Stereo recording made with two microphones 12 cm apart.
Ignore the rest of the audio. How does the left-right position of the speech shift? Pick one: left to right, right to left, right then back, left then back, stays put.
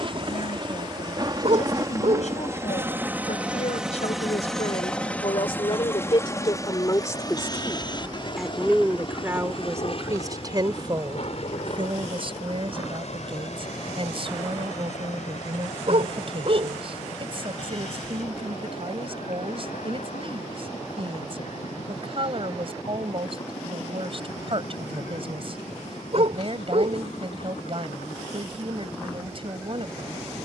left to right.